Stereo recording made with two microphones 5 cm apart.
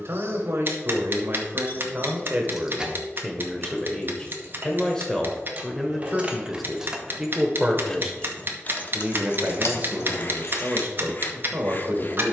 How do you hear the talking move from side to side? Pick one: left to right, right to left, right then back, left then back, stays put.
left then back.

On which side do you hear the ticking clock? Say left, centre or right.
right.